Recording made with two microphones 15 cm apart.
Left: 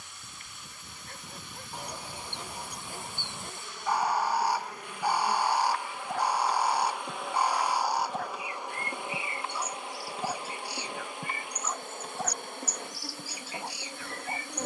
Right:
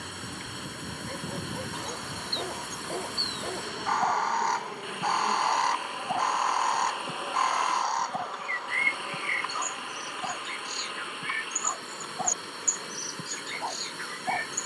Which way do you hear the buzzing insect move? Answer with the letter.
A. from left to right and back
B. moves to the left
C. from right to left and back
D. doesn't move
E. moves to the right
B.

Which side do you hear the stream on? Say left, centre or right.
right.